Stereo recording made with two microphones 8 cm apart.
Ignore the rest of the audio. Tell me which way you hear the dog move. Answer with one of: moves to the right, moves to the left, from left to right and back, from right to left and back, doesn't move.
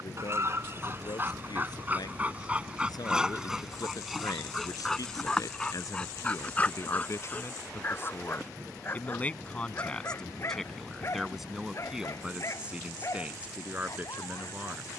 moves to the left.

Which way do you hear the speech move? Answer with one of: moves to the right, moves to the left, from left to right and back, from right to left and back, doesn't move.
moves to the right.